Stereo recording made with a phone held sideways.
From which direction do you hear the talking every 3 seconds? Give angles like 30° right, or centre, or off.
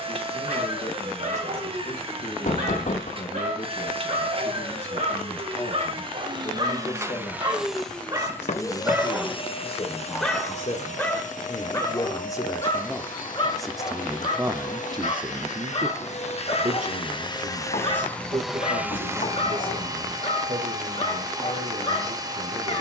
50° left, 50° left, 50° left, 40° left, centre, 50° right, 70° right, 70° right.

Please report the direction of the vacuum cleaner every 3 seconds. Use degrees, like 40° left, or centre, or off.
40° right, 40° right, 10° right, 50° left, 70° left, 40° left, 20° right, 30° right.